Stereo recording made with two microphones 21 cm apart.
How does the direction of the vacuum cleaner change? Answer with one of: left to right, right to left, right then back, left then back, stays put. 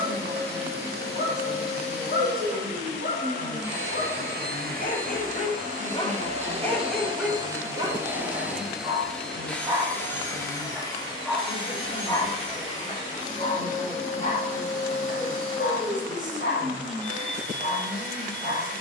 right to left.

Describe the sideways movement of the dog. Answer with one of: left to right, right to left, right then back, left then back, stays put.
right then back.